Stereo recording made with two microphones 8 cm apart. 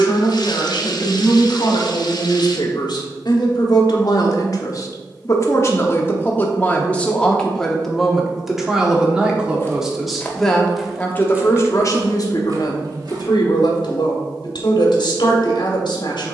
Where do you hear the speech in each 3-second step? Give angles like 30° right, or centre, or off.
70° left, 50° left, 10° left, 10° left, 60° left, 70° left.